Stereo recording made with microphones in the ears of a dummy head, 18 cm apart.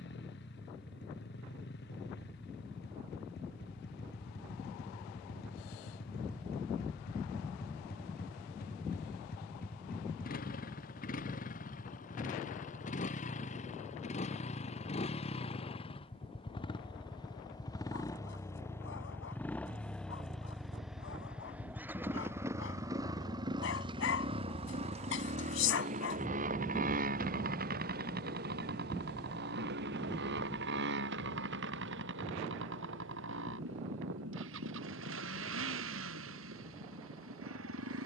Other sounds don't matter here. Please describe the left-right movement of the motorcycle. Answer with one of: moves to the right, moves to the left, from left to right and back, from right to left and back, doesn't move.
moves to the right.